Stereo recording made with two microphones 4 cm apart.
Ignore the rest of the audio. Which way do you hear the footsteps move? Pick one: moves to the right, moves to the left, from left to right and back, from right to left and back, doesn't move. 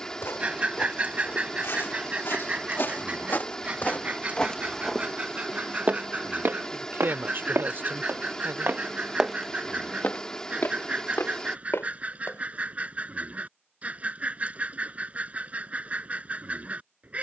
from left to right and back.